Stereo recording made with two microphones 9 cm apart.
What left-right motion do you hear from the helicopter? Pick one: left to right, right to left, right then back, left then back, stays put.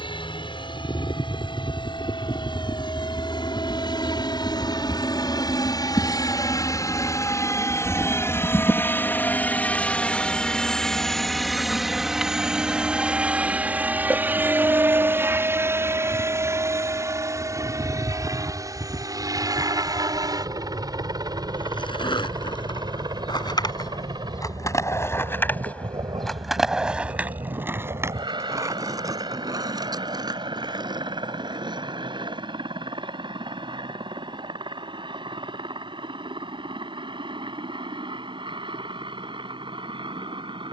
left to right.